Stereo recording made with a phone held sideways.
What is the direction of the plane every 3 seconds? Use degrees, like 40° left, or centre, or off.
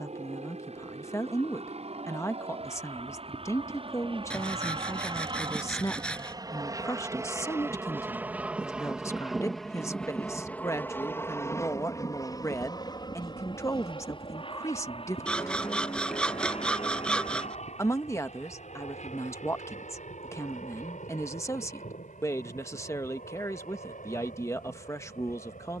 60° right, 40° right, 20° right, 10° left, 30° left, 50° left, 60° left, 60° left, 70° left.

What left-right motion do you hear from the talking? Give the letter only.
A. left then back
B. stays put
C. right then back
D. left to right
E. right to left
B.